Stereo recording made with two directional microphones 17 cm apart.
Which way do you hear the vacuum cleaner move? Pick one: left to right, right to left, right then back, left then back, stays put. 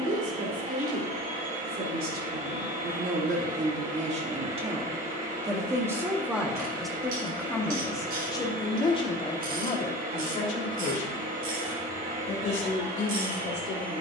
stays put.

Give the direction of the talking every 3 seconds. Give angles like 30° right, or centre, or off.
60° right, 30° right, 10° left, 40° left, 60° left.